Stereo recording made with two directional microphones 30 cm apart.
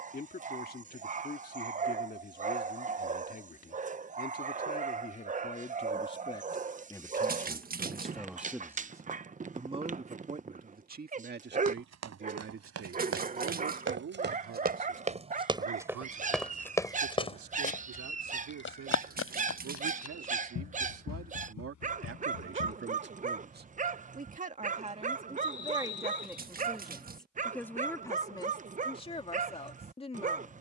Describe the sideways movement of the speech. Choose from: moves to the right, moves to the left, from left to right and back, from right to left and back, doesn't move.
from left to right and back.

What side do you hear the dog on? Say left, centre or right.
right.